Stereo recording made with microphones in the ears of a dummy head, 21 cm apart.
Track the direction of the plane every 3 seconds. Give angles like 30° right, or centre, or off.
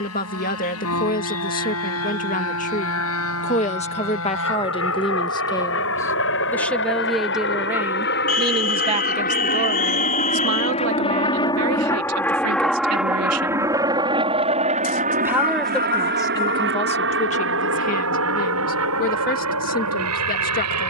70° left, 60° left, 50° left, 30° left, 10° right, 40° right, 60° right.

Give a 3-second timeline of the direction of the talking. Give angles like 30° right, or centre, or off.
40° left, 20° left, 10° right, 50° right, 70° right, 20° left, 40° left.